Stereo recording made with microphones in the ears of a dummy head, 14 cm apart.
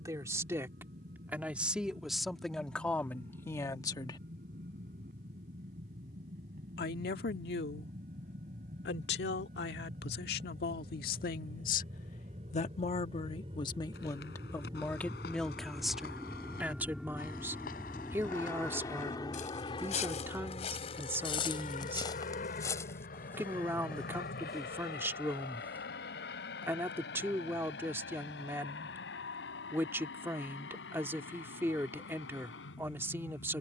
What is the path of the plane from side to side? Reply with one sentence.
You can hear the plane move to the left.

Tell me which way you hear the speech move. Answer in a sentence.
You can hear the speech go left and come back.